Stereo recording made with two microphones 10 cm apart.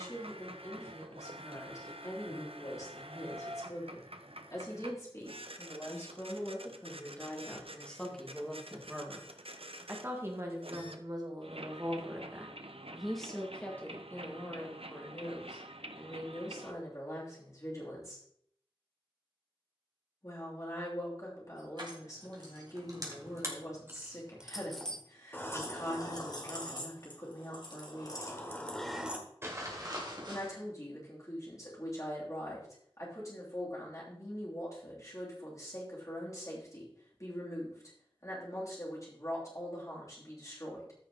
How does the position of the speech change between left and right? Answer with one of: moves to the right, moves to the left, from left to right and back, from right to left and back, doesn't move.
from left to right and back.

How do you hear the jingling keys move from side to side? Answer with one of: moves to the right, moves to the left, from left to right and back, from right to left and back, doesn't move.
from right to left and back.